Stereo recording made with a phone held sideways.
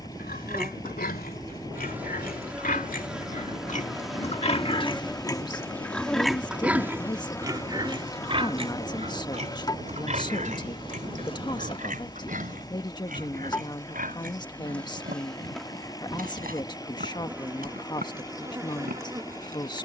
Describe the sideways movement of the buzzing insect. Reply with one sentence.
In this clip you hear the buzzing insect move from right to left and back again.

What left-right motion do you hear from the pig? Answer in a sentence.
You can hear the pig move from left to right.